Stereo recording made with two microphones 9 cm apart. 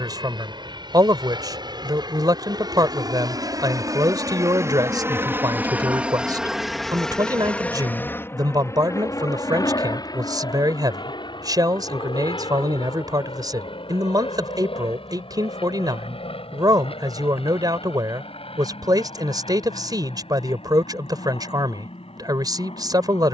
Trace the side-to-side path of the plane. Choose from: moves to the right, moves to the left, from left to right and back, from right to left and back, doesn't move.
moves to the left.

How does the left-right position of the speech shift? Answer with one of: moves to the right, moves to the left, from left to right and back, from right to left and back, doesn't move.
doesn't move.